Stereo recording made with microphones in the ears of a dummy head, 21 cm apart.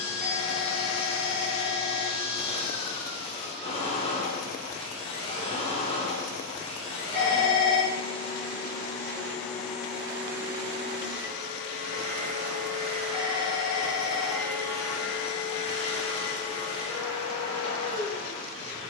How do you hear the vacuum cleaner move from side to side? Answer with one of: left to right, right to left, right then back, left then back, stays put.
right then back.